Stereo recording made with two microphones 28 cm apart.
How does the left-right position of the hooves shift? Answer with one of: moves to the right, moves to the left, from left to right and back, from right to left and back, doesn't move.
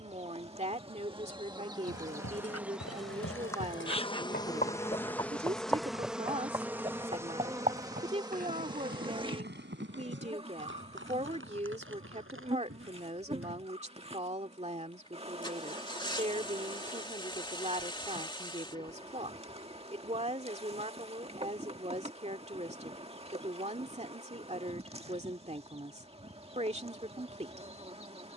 moves to the right.